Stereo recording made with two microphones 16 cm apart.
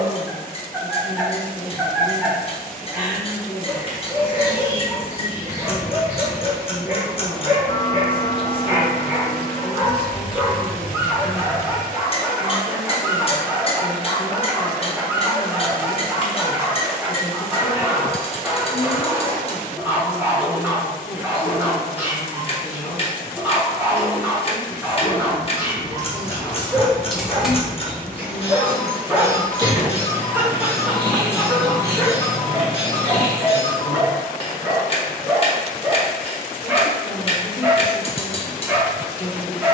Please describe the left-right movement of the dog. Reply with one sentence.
You can hear the dog stay in one place.